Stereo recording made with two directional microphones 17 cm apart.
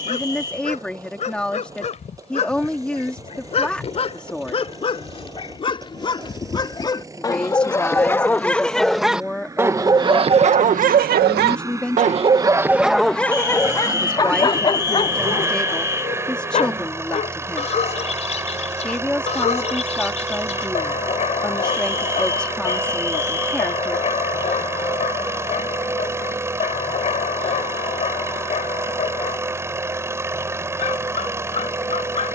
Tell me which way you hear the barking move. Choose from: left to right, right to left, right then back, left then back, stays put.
right then back.